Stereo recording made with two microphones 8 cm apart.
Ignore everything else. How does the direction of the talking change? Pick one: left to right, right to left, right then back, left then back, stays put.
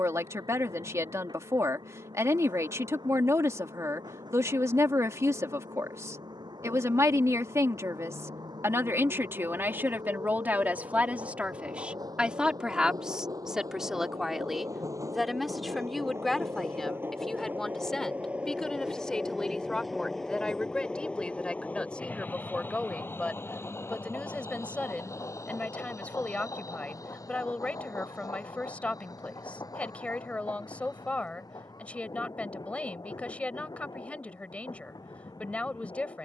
right to left.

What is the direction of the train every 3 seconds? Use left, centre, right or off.
right, right, right, right, right, right, centre, left, left, left, left, left.